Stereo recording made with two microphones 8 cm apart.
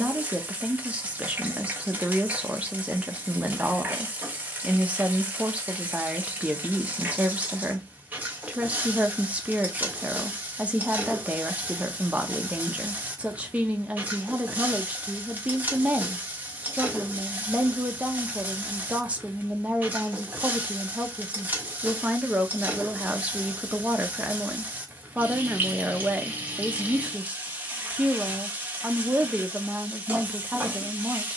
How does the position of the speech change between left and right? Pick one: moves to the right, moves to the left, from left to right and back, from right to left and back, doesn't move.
doesn't move.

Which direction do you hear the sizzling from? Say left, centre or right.
right.